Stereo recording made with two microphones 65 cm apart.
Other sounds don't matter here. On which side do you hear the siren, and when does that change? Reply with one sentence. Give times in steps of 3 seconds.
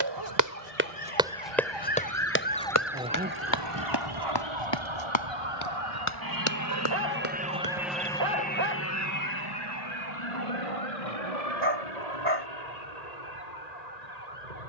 In this clip you hear the siren on the left from 0 s and on the right from 3 s.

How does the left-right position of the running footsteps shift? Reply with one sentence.
In this clip you hear the running footsteps move from right to left.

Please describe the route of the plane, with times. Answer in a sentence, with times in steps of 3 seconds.
You can hear the plane on the right from 0 s, in the centre from 6 s and on the left from 9 s.